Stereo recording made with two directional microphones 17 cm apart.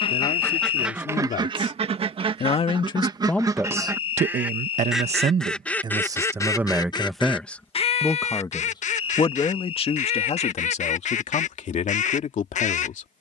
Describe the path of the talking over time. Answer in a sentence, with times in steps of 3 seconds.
You can hear the talking on the left from 0 s, on the right from 3 s, in the centre from 6 s and on the left from 9 s.